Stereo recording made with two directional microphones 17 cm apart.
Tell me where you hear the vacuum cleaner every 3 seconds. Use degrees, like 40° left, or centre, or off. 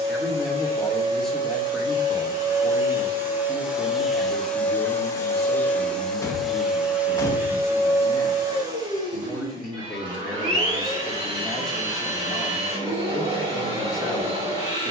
30° right, centre, 10° right, 30° right, 30° right.